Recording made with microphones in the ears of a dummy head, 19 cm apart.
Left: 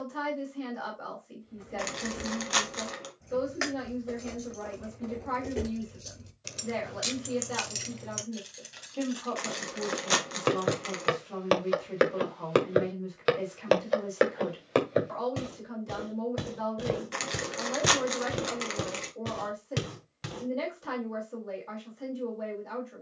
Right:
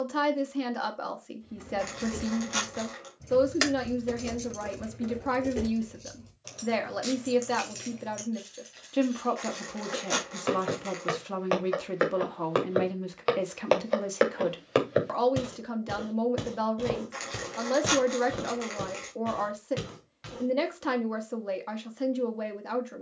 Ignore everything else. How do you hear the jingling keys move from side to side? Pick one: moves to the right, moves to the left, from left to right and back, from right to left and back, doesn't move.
moves to the left.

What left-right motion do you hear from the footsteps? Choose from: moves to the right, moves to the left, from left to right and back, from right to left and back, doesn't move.
from left to right and back.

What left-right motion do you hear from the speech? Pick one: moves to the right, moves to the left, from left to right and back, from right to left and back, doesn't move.
doesn't move.